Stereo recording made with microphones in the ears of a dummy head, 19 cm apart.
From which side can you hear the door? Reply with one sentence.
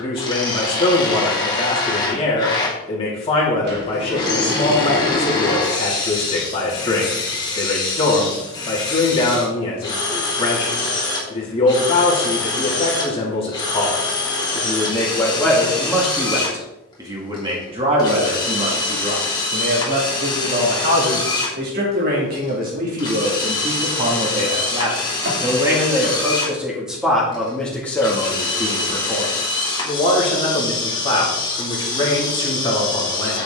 In this clip you hear the door on the right.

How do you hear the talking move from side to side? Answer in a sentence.
You can hear the talking move from left to right and back again.